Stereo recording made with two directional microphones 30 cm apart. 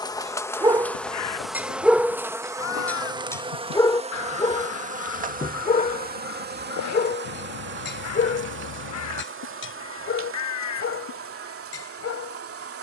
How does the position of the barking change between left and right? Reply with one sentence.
In this clip you hear the barking move from right to left.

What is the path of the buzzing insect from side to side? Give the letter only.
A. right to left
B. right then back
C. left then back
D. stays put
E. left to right
E.